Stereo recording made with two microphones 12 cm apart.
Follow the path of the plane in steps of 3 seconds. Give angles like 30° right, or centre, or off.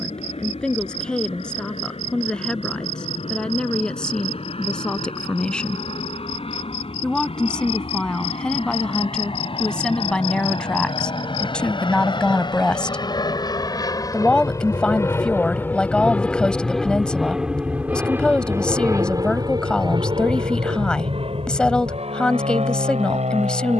70° left, 60° left, 60° left, 50° left, 40° left, 10° left, 30° right, 60° right.